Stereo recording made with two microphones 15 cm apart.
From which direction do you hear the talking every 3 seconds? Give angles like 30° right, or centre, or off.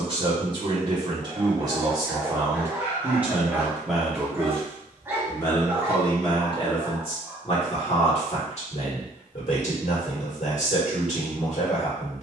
30° right, 10° left, 40° left, 50° left.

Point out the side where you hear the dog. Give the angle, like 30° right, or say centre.
20° right.